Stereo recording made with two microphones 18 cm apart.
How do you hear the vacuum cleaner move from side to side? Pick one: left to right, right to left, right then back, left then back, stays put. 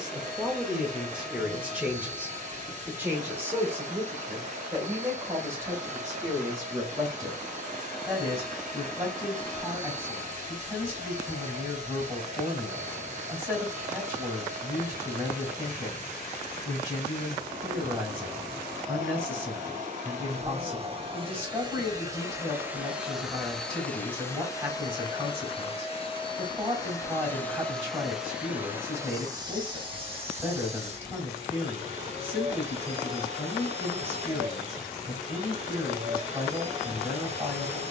left then back.